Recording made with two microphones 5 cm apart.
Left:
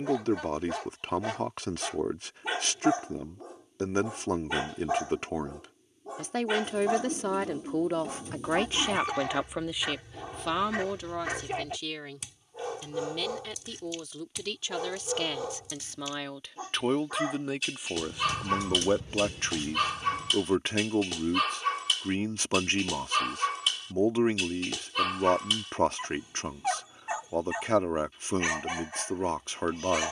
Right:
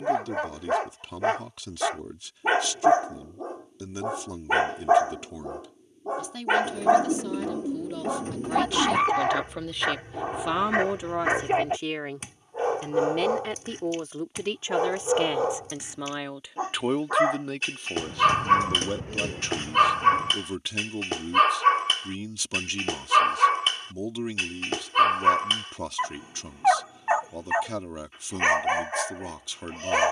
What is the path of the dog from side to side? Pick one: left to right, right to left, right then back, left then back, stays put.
stays put.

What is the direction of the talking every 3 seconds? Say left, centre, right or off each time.
left, left, left, centre, right, centre, left, left, left, left.